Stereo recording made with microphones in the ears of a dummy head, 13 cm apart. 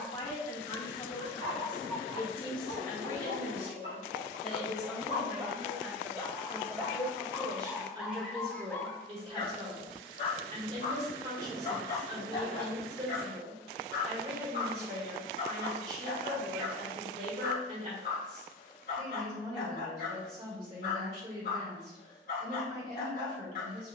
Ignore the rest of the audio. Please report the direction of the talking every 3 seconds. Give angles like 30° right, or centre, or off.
30° left, 10° left, 30° right, 40° right, 40° right, 40° right, 40° right, 40° right.